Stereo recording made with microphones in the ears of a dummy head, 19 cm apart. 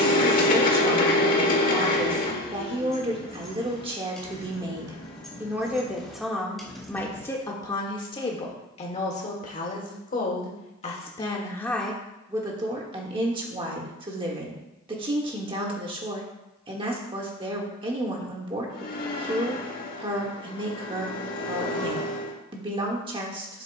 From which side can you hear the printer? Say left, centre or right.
left.